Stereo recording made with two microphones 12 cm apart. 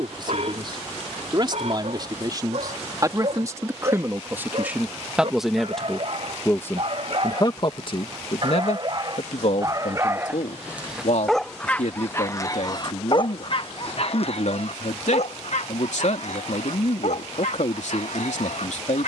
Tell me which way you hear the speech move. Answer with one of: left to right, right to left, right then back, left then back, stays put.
right to left.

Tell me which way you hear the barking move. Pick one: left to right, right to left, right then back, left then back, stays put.
right to left.